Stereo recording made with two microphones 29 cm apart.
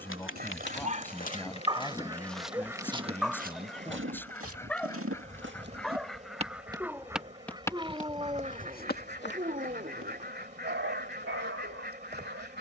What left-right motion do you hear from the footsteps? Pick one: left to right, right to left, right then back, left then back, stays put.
right then back.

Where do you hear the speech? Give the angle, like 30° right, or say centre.
10° left.